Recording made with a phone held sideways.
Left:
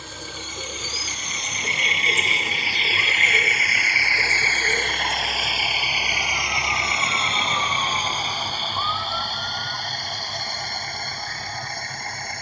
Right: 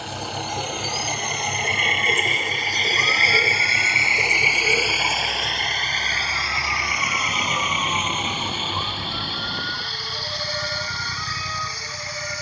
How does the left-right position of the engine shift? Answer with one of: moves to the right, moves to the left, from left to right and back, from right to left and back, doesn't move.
moves to the left.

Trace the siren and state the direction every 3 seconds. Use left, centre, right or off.
left, left, centre, right.